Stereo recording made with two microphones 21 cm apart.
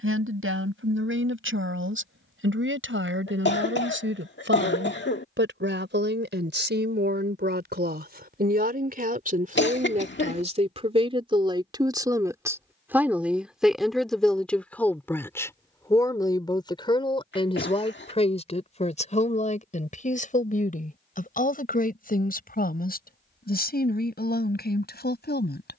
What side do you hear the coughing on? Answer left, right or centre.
left.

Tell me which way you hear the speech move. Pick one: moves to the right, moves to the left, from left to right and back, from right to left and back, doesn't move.
moves to the left.